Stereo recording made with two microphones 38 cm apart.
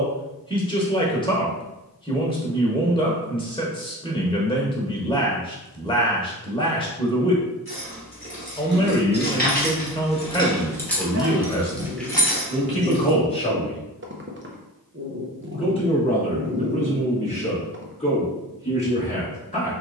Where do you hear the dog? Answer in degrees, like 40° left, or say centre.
30° right.